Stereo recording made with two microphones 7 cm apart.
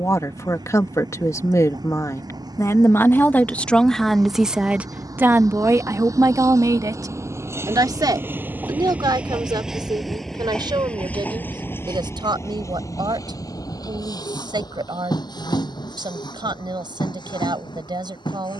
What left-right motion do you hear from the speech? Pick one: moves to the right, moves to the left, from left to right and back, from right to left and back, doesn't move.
moves to the right.